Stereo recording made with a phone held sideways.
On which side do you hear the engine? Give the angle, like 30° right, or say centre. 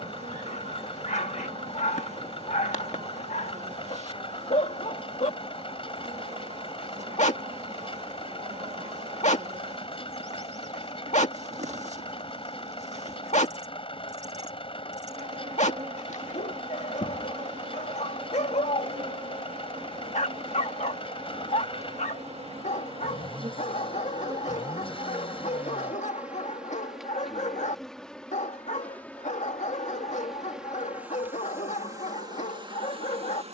40° left.